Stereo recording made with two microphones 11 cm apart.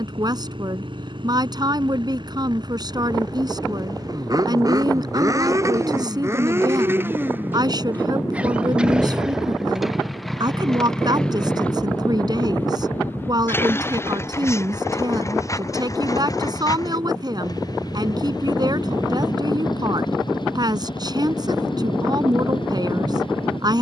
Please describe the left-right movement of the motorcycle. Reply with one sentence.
You can hear the motorcycle travel towards the left.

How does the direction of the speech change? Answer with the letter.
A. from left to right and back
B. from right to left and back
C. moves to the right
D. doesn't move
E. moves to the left
D.